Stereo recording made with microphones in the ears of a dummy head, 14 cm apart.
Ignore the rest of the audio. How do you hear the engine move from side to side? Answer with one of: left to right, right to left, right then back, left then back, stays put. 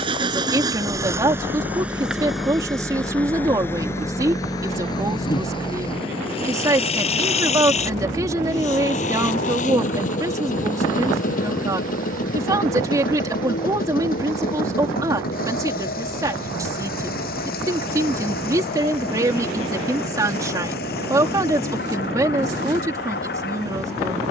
right to left.